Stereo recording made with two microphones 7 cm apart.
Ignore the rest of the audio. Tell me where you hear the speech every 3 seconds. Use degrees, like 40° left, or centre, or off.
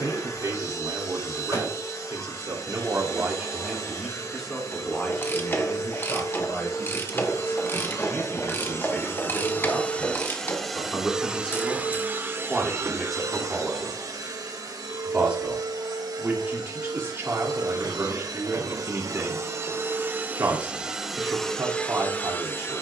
50° right, centre, 30° left, 20° left, centre, 30° right, 40° right, 40° right.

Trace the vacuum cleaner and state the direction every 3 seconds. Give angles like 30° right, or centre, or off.
50° left, 50° left, 40° left, centre, 50° right, 70° right, 40° right, 20° left.